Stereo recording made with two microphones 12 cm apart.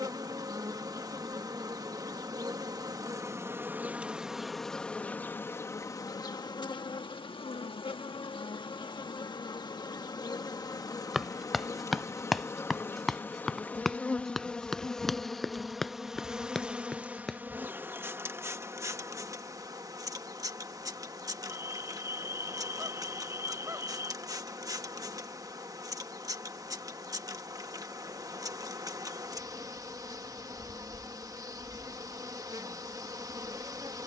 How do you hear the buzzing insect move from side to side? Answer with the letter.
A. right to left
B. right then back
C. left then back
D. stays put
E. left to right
C.